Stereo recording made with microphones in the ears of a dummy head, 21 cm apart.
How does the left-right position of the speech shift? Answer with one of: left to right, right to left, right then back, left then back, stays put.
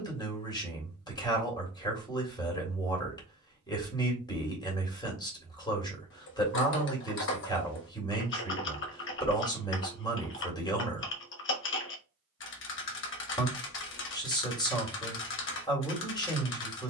stays put.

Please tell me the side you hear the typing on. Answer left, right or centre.
left.